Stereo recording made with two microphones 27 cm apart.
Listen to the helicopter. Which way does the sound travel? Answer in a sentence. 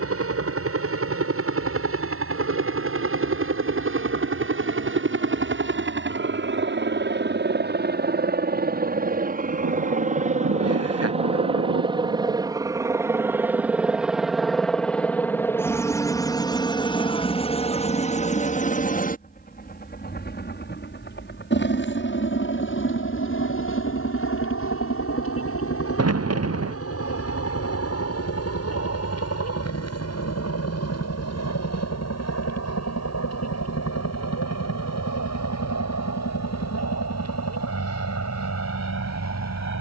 You can hear the helicopter move to the left.